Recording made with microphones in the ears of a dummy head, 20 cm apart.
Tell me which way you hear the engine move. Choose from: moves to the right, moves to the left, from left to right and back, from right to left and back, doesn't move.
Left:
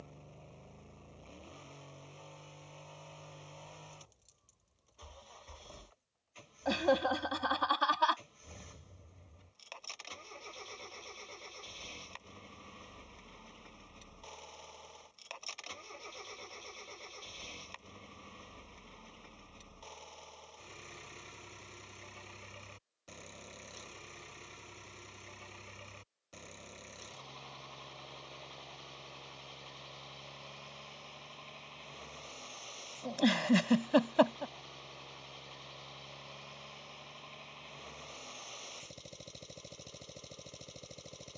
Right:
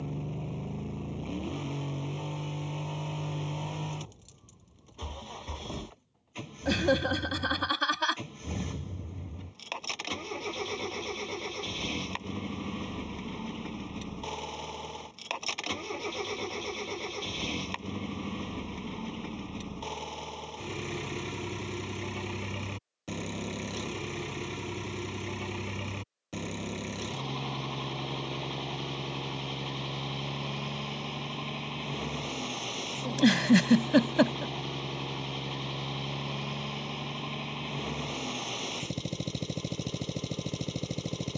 doesn't move.